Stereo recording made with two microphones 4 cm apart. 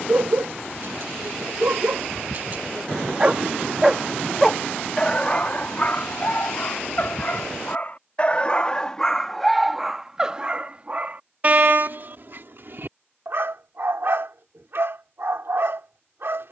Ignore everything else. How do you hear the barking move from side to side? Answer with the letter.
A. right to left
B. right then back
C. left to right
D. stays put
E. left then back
E.